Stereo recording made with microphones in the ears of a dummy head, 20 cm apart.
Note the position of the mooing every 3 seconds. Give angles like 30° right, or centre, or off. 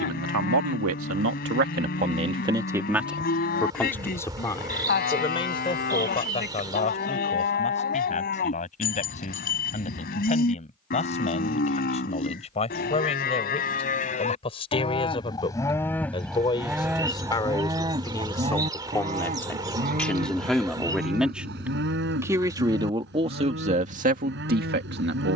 40° left, 40° left, 40° left, 40° left, 40° left, centre, 40° right, 50° right, 50° right.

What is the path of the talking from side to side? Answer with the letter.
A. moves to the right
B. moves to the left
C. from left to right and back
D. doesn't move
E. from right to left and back
E.